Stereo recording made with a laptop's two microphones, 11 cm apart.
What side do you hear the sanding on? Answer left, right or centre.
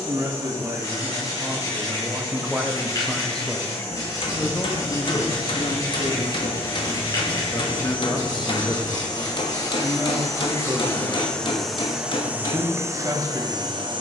left.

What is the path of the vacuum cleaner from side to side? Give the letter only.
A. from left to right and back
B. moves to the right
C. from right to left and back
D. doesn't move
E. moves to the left
B.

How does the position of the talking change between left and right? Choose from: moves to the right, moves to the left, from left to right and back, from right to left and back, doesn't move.
from right to left and back.